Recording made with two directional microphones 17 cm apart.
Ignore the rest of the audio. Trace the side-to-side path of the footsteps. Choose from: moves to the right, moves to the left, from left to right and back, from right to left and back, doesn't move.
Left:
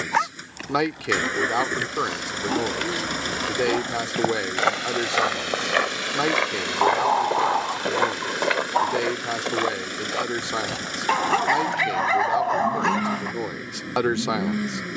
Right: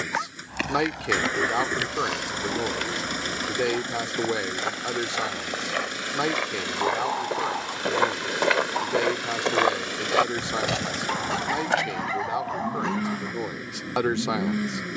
from right to left and back.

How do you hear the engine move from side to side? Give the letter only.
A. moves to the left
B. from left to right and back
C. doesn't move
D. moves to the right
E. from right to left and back
C.